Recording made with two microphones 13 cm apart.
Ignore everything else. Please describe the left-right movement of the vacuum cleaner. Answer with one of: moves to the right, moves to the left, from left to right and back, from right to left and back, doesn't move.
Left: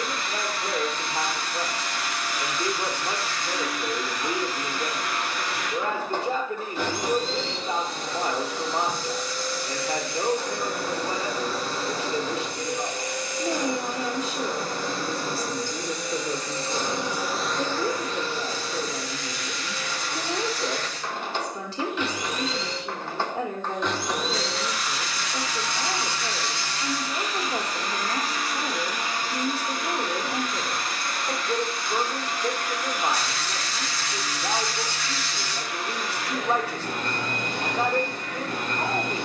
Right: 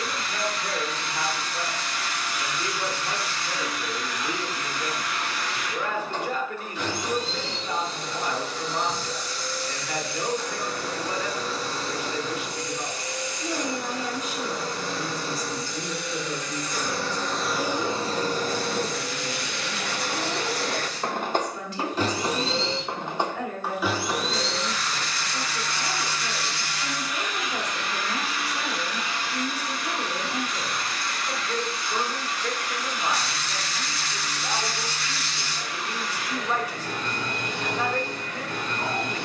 from left to right and back.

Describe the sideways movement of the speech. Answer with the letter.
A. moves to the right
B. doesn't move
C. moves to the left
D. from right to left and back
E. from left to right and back
B.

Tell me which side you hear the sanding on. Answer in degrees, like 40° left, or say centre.
60° right.